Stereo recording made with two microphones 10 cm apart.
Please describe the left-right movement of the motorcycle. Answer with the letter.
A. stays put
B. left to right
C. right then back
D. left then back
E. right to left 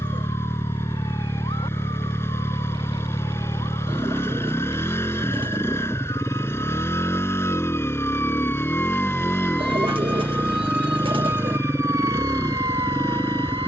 A.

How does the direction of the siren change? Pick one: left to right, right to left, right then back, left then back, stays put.
left to right.